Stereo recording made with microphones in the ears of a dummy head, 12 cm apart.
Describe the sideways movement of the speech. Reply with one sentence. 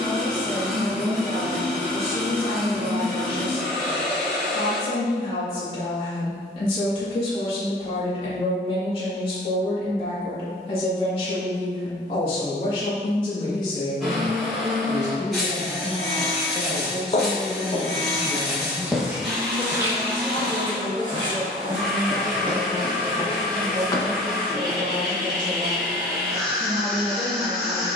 In this clip you hear the speech move to the right.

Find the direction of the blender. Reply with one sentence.
You can hear the blender in the centre.